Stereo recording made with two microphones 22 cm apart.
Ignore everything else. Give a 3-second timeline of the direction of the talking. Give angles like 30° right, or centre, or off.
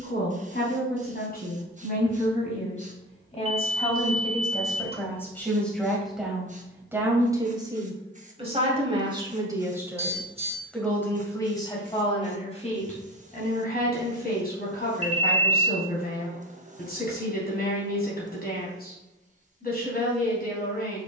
40° left, 10° left, 20° right, centre, 40° left, 40° left, 40° left.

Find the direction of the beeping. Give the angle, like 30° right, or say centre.
30° right.